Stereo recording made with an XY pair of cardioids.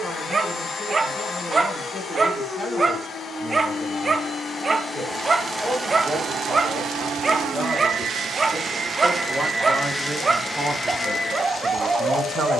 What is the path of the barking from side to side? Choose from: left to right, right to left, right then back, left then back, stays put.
stays put.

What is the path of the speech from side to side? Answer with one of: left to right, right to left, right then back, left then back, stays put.
left to right.